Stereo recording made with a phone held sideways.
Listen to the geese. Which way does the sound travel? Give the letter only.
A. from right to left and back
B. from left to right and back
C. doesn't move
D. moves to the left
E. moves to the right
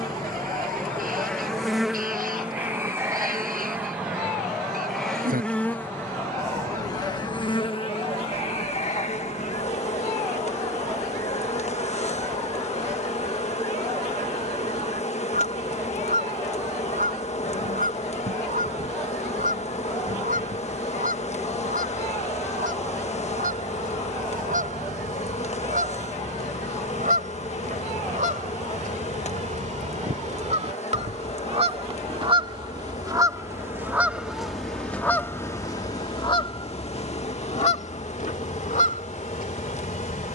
D.